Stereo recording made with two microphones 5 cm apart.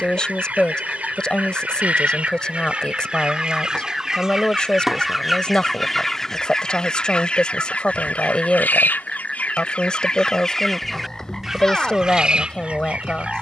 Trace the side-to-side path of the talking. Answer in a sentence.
You can hear the talking stay in one place.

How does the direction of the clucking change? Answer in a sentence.
In this clip you hear the clucking go left and come back.